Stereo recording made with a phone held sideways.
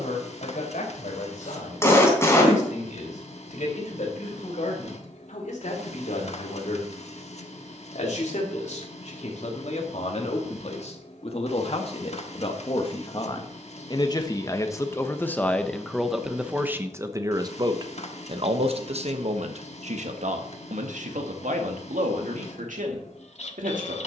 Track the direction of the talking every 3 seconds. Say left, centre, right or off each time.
left, left, left, left, left, centre, right, right.